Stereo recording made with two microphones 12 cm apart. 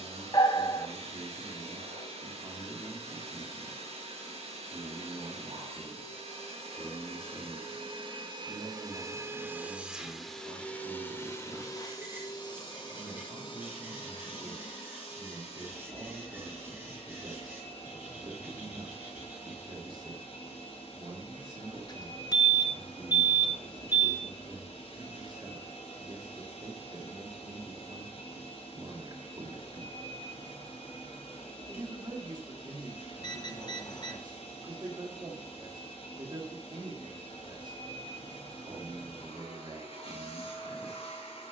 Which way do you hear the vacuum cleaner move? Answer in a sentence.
You can hear the vacuum cleaner move to the left.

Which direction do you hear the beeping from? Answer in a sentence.
You can hear the beeping on the left.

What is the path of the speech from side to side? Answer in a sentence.
In this clip you hear the speech stay in one place.